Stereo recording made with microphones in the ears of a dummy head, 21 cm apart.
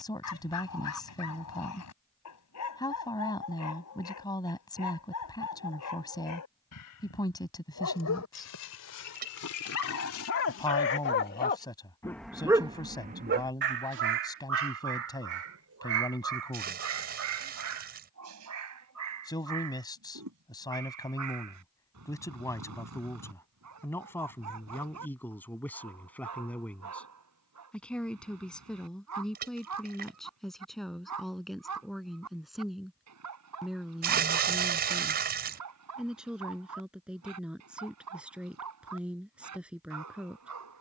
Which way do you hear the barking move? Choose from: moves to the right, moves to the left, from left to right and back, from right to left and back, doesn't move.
moves to the right.